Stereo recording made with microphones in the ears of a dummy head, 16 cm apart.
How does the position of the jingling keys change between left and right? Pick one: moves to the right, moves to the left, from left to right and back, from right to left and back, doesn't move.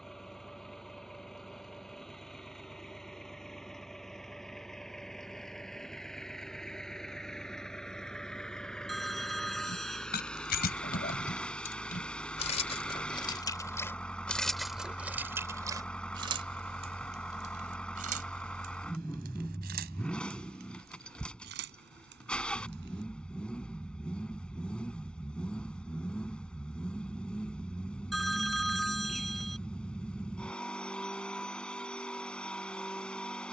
moves to the right.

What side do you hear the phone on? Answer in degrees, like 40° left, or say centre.
centre.